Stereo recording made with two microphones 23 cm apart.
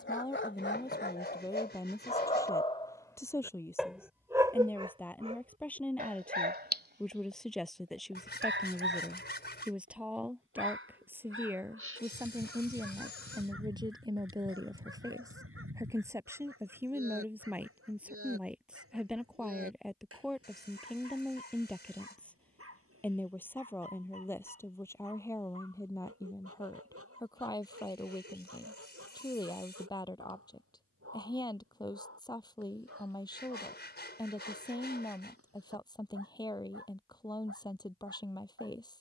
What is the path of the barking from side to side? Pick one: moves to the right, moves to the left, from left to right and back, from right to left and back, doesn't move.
moves to the right.